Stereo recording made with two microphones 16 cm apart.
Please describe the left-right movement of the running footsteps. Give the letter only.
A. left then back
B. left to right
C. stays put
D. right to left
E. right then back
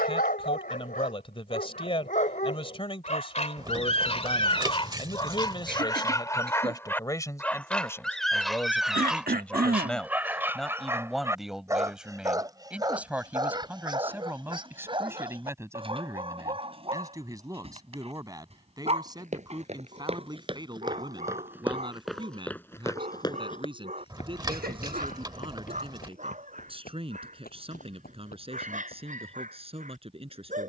D.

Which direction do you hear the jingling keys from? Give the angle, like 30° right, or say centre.
30° right.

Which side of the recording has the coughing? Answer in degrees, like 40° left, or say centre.
70° right.